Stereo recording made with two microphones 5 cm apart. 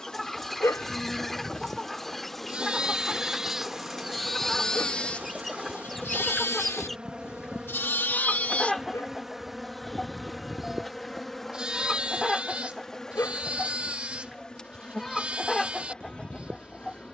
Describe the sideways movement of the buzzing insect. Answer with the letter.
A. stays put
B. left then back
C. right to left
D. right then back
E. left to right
D.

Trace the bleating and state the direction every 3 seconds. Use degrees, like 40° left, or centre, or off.
20° right, 10° left, 50° left, 10° right, 20° right, 20° right.